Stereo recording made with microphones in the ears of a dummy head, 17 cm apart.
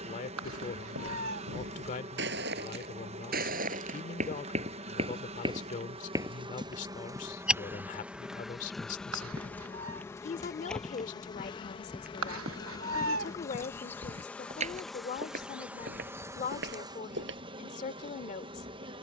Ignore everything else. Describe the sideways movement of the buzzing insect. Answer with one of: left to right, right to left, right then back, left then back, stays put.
left then back.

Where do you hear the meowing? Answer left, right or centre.
right.